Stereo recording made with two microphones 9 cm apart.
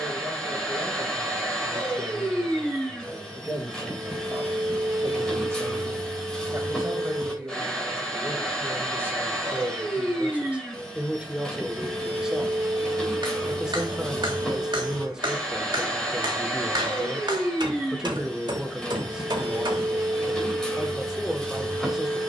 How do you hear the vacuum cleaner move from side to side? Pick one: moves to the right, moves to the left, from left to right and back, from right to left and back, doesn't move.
doesn't move.